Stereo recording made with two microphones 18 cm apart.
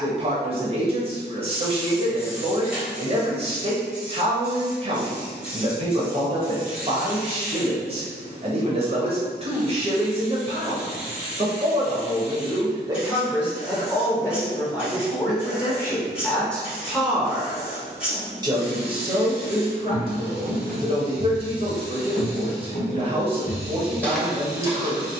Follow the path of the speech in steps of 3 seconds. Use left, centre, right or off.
right, right, right, right, centre, centre, right, right, right.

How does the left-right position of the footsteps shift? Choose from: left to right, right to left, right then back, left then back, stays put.
left then back.